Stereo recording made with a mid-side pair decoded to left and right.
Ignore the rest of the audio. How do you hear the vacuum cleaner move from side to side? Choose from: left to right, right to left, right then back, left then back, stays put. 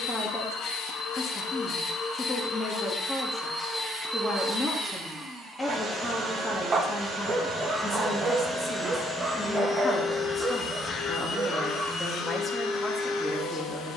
right then back.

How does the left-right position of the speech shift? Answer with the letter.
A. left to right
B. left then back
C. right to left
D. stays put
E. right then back
D.